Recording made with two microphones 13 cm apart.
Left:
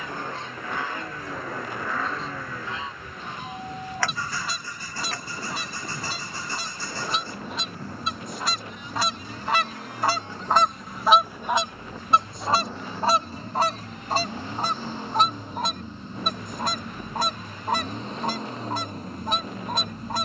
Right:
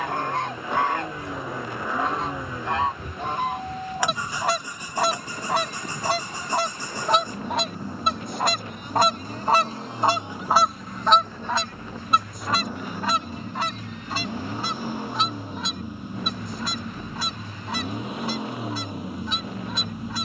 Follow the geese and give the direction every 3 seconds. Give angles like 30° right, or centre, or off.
80° right, 80° right, 70° right, 20° right, 40° left, 50° left, 50° left.